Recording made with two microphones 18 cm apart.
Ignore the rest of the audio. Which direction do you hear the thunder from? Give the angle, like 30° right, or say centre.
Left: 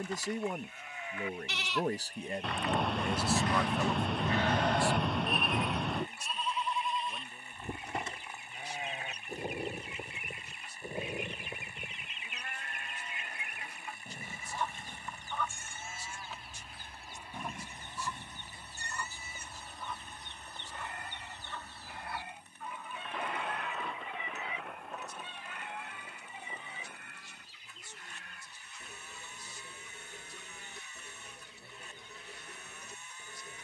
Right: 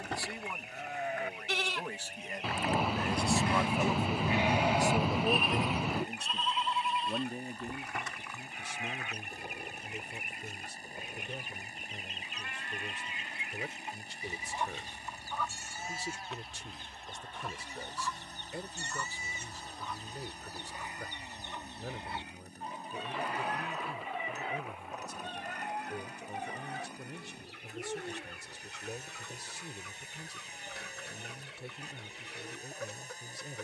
centre.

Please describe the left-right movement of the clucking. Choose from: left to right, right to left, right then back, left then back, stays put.
left then back.